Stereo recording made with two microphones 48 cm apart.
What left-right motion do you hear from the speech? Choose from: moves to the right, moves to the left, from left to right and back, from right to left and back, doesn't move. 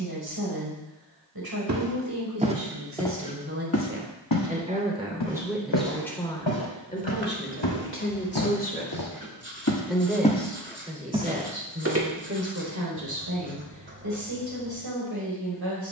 from right to left and back.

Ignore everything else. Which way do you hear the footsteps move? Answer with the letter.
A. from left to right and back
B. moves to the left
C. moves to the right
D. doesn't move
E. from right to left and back
E.